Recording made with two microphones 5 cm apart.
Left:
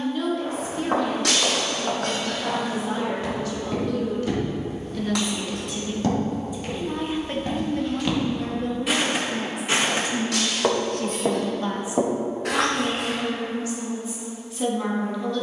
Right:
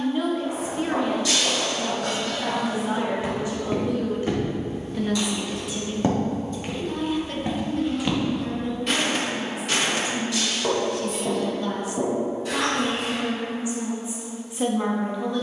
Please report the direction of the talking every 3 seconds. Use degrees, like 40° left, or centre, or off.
20° right, 20° right, 30° left, 50° left, 10° right.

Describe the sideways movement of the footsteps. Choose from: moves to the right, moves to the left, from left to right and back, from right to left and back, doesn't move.
from left to right and back.